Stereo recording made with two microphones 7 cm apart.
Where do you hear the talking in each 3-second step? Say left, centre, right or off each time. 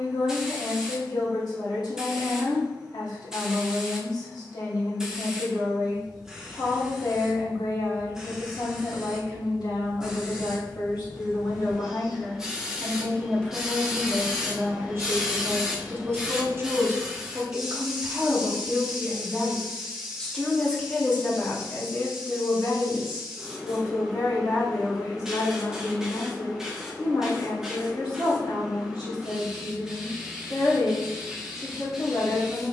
left, left, left, left, centre, right, centre, left, left, left, left.